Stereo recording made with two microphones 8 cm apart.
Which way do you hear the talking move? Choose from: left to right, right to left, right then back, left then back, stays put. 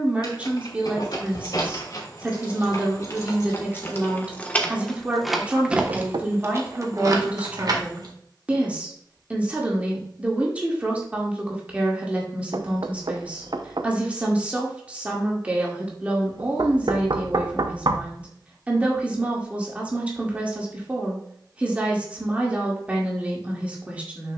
stays put.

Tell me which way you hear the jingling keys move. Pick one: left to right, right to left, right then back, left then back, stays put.
left to right.